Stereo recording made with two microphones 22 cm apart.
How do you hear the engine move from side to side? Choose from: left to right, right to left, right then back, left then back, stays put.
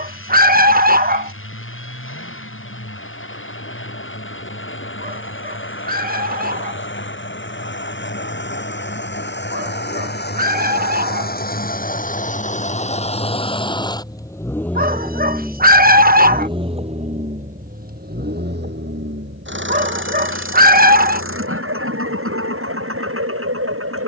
left to right.